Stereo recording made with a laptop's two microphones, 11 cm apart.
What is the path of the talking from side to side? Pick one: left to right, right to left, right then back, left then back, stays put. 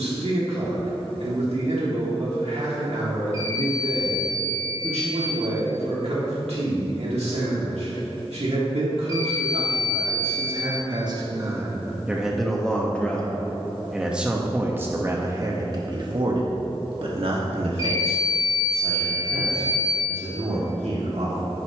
left then back.